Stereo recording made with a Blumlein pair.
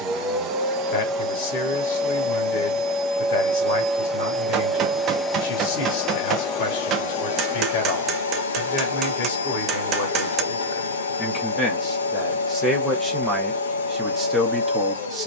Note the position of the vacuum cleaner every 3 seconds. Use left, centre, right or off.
right, centre, left, left, left.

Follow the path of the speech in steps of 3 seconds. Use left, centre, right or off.
left, left, left, left, centre.